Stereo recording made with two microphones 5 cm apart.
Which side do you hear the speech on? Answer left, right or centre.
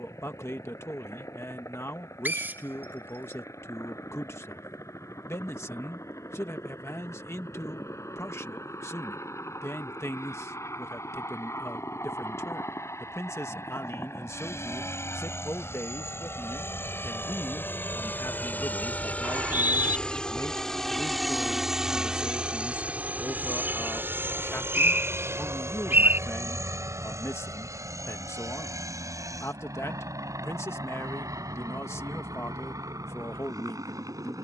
left.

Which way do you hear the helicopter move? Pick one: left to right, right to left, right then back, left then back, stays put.
left to right.